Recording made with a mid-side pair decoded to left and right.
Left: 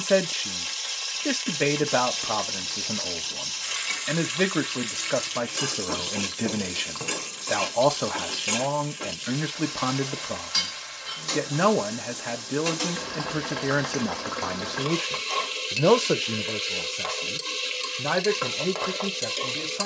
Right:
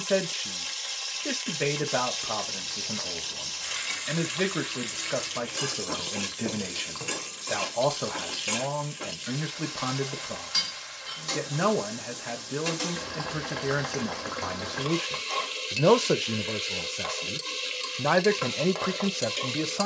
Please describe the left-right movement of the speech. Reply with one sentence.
In this clip you hear the speech move from left to right.